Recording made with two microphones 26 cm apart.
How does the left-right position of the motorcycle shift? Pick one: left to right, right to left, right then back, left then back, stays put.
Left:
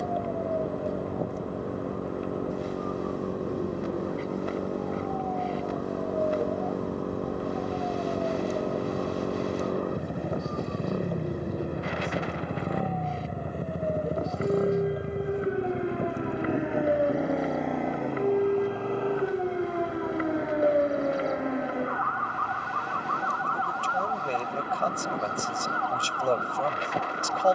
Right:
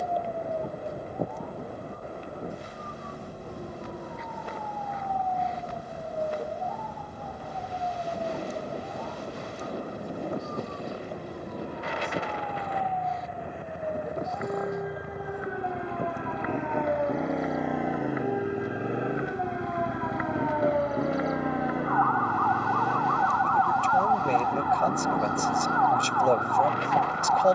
left to right.